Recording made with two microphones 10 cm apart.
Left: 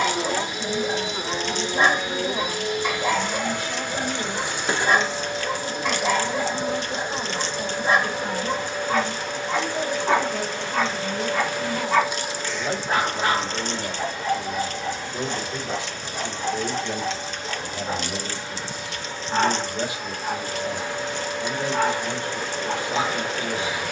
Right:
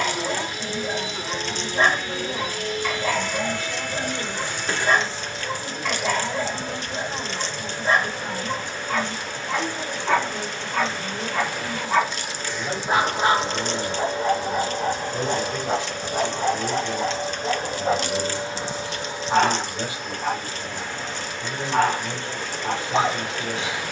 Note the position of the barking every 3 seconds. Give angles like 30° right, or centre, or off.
20° left, 20° left, 20° left, 10° left, 30° right, 60° right, 70° right, 70° right.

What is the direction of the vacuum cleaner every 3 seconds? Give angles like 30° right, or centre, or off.
20° left, 20° left, 20° left, 20° left, 20° right, 50° right, 10° right, 10° left.